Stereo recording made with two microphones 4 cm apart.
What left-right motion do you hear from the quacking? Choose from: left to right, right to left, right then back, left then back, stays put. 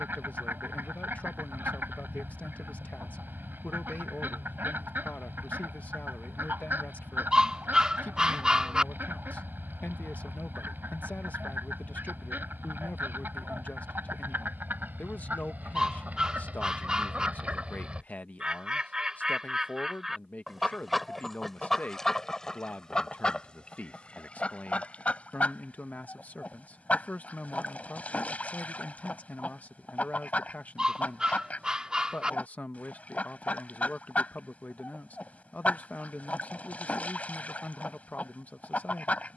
right to left.